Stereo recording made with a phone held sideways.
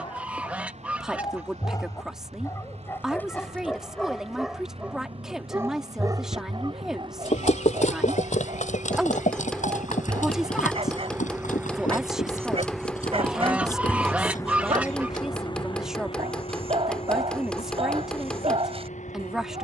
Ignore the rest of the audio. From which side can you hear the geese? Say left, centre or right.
centre.